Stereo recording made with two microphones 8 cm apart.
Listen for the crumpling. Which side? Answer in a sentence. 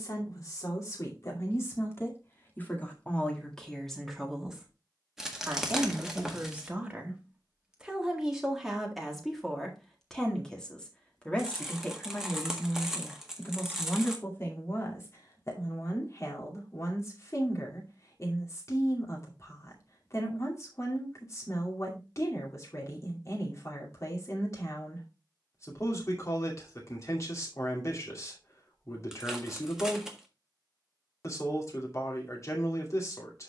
In this clip you hear the crumpling in the centre.